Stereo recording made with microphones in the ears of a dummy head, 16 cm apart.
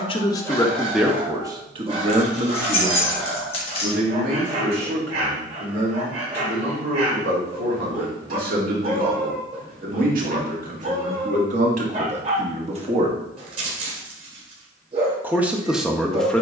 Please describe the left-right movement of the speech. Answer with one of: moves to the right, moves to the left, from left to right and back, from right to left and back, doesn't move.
from left to right and back.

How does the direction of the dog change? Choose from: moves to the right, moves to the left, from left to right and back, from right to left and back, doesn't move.
doesn't move.